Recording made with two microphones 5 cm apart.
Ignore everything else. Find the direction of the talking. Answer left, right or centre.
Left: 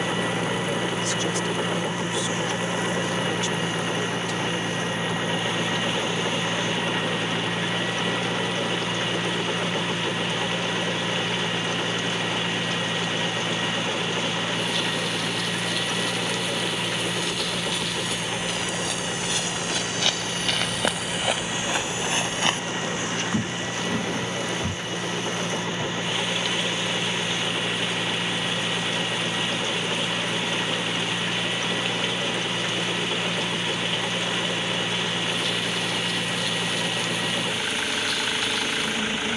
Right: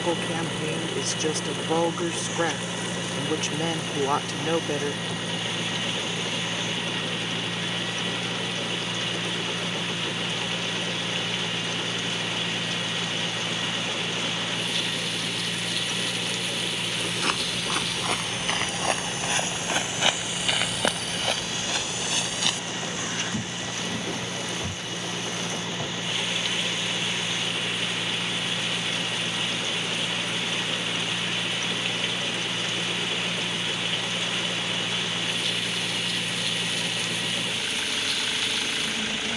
right.